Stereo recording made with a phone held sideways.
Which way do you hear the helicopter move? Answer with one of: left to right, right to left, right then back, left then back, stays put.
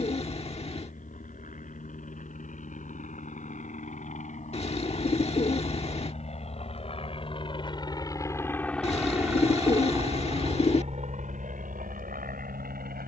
left to right.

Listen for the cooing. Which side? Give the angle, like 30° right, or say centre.
40° left.